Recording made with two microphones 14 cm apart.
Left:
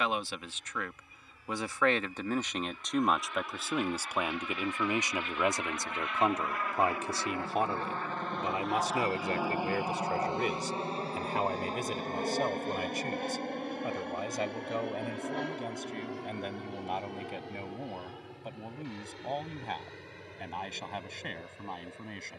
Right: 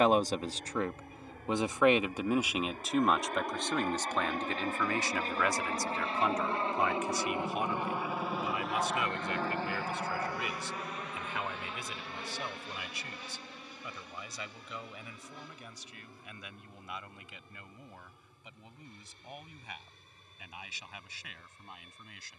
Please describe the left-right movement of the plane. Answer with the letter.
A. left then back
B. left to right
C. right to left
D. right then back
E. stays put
C.